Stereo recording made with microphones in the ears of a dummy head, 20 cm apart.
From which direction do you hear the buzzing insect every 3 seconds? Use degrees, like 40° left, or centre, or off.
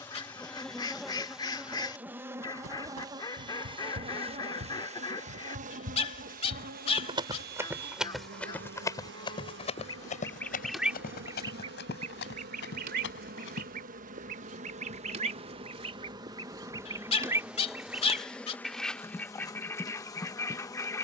centre, 30° right, 40° right, 50° right, 40° right, 10° right, 10° left.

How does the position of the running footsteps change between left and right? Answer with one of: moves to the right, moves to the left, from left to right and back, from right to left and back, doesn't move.
moves to the left.